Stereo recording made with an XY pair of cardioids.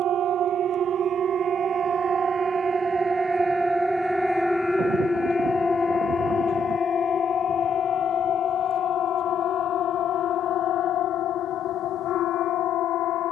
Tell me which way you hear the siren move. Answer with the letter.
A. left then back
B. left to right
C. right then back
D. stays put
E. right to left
E.